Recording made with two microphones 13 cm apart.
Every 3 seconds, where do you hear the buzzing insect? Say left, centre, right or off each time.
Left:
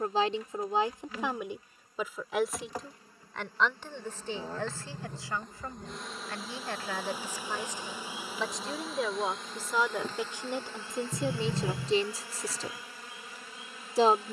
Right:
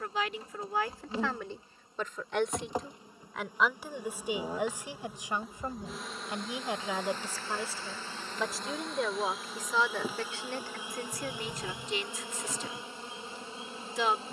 right, centre, centre, centre, right.